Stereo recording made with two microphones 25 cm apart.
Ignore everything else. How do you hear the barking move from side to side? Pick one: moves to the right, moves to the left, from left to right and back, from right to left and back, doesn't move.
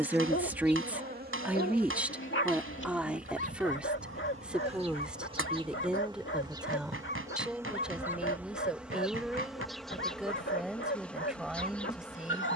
doesn't move.